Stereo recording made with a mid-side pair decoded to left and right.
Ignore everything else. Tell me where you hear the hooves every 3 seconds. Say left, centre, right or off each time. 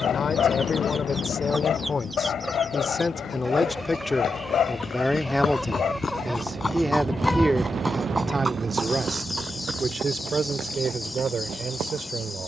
off, left, centre, right.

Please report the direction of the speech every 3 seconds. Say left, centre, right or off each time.
left, centre, right, right.